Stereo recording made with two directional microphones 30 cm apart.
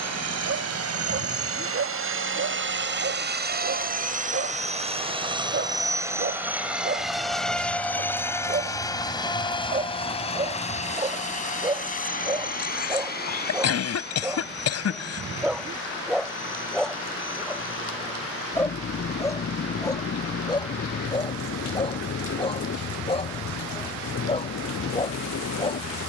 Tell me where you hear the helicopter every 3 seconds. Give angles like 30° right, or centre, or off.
50° right, 20° right, centre, 20° left, 30° left, 40° left, 40° left, 50° left, 50° left.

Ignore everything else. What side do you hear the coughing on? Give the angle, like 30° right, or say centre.
60° left.